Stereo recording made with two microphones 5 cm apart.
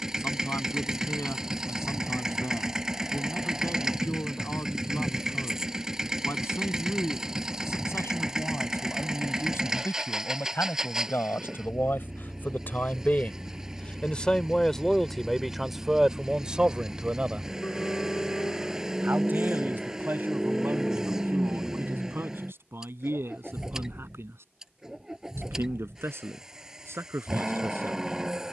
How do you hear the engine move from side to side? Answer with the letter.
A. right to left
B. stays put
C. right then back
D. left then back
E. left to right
B.